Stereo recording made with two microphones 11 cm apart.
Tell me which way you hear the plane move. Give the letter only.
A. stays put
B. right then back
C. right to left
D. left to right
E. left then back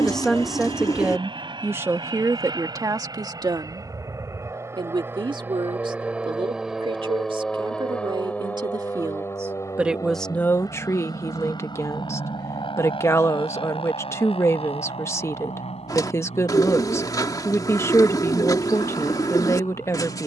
C.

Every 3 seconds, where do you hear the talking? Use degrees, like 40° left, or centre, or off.
20° right, 40° right, 50° right, 10° left, 20° left, 20° left, 20° left.